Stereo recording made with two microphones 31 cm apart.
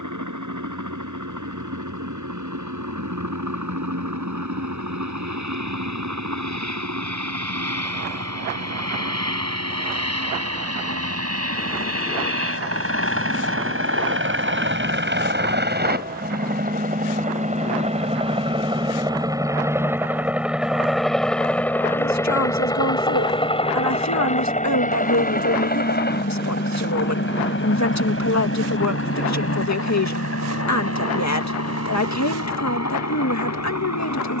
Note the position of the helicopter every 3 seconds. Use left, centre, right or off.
right, right, right, right, right, right, centre, centre, left, left, left, left.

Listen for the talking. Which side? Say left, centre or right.
left.